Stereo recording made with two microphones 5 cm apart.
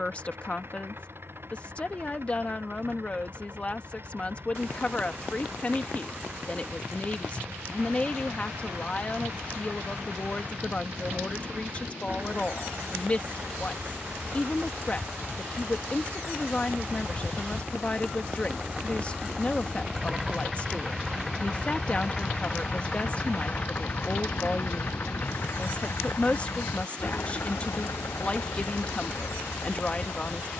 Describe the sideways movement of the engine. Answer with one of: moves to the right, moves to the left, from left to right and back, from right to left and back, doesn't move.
moves to the left.